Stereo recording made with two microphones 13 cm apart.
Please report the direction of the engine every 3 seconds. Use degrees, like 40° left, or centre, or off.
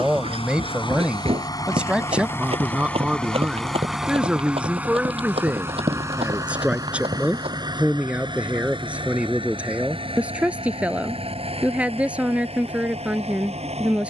30° left, 10° right, 30° right, 40° right, 50° right.